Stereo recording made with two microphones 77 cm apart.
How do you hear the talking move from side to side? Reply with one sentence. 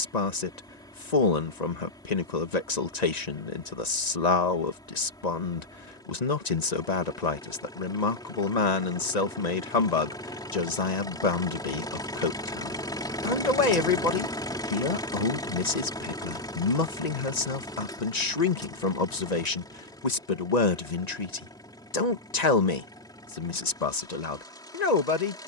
In this clip you hear the talking stay put.